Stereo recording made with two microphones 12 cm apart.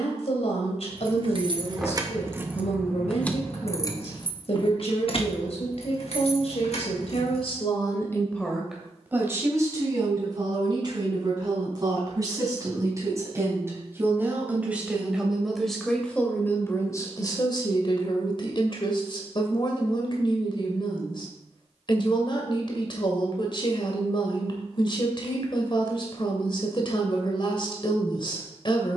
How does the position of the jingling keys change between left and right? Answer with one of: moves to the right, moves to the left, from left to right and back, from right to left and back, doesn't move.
moves to the left.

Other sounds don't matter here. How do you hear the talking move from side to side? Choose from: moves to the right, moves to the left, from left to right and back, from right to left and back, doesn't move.
from left to right and back.